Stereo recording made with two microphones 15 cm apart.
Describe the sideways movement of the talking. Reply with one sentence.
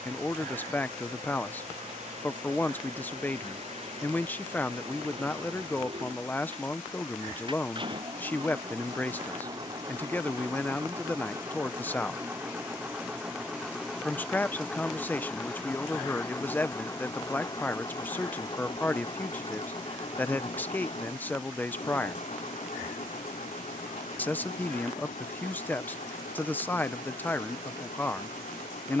In this clip you hear the talking stay in one place.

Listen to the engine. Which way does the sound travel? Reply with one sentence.
You can hear the engine move from right to left.